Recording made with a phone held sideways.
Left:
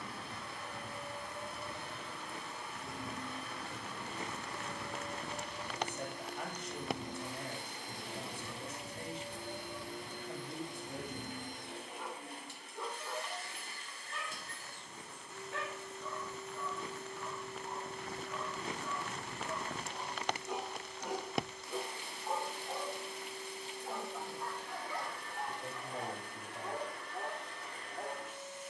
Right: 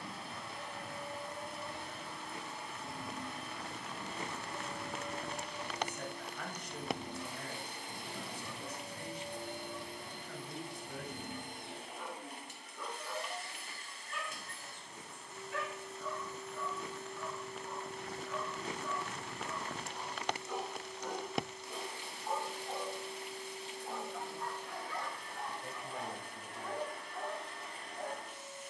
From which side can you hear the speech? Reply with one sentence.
In this clip you hear the speech on the left.